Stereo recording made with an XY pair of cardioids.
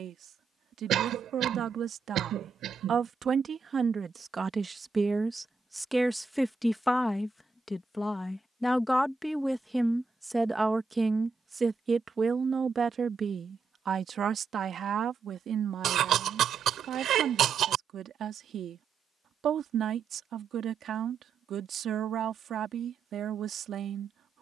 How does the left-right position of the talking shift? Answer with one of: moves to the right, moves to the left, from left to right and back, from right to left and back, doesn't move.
from right to left and back.